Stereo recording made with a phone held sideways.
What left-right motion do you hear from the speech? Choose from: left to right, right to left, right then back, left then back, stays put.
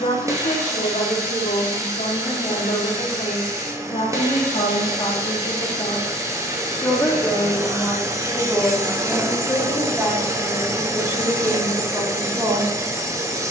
left to right.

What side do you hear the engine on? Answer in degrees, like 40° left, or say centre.
20° right.